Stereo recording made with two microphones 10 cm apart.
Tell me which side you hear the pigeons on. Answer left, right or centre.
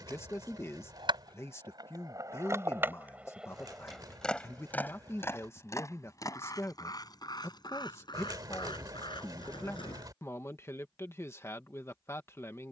right.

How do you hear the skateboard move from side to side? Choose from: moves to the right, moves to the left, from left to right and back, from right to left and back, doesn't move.
moves to the left.